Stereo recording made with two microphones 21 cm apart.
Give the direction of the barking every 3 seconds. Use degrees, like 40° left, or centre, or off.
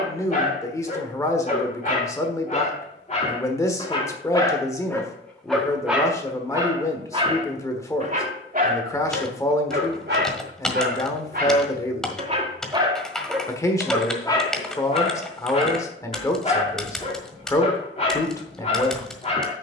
40° left, 20° left, 30° right, 50° right, centre, 30° left, 30° left.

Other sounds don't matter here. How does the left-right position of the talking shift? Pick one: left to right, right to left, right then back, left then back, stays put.
stays put.